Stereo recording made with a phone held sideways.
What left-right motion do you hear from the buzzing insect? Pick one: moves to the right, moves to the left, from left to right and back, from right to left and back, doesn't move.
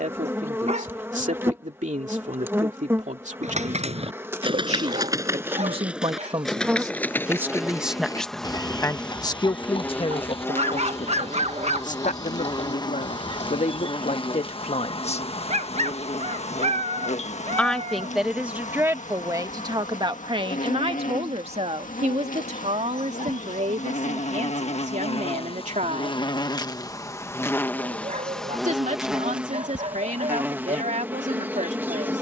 from right to left and back.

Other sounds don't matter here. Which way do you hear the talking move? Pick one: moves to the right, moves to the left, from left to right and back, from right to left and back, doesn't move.
from right to left and back.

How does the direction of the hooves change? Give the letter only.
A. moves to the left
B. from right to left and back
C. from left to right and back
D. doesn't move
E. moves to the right
A.